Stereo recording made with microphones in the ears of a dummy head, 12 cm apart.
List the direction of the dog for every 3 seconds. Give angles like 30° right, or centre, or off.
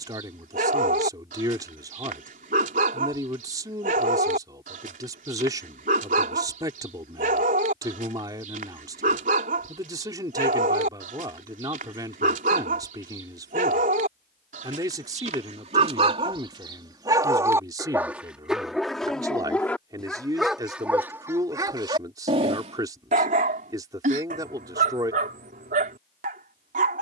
70° right, 70° right, 70° right, 70° right, 70° right, 40° right, centre, 40° right, 70° right.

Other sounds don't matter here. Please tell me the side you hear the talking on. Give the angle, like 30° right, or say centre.
30° right.